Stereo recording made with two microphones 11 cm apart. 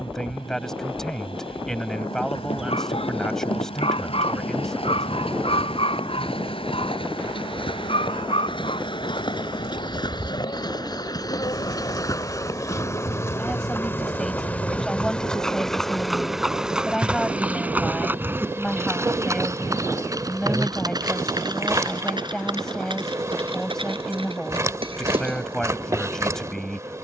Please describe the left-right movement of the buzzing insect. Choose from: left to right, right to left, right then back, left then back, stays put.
left to right.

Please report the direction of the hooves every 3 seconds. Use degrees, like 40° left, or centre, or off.
60° left, 60° left, 50° left, 40° left, 20° left, centre, 30° right, 40° right, 50° right.